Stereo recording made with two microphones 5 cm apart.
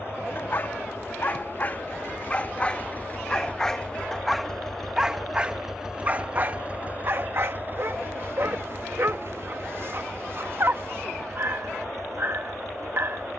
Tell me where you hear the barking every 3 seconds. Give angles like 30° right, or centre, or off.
30° left, centre, 50° right, 50° right, 50° right.